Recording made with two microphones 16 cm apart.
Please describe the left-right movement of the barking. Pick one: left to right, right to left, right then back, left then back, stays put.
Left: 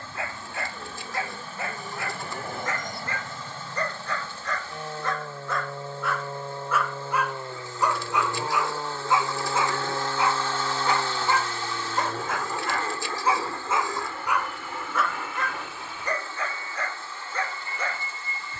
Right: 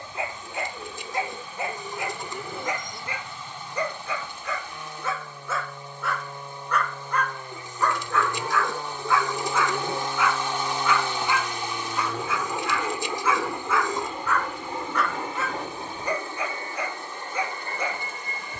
left then back.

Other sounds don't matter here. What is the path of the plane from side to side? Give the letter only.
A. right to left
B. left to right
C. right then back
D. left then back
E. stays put
B.